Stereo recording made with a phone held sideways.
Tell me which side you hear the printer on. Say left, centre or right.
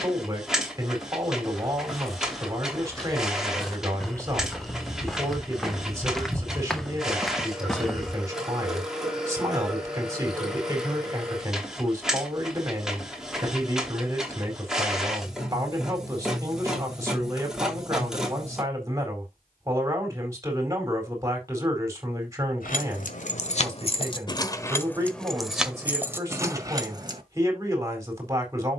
centre.